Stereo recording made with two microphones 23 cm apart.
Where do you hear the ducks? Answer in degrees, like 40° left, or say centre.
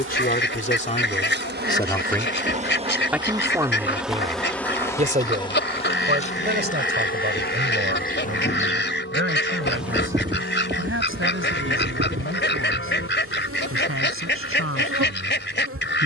50° left.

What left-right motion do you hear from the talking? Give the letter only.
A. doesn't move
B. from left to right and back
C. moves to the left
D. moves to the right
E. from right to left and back
D.